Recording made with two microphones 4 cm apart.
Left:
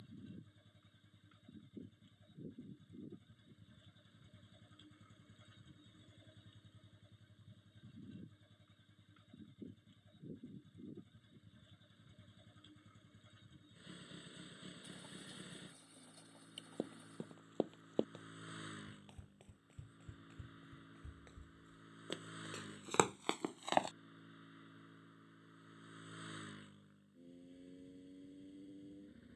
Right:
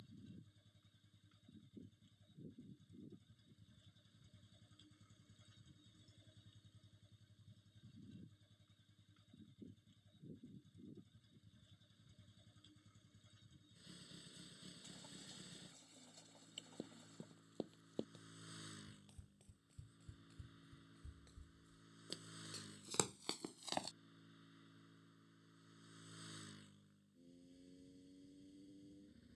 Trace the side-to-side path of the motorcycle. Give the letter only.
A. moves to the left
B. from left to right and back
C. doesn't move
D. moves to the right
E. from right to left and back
C.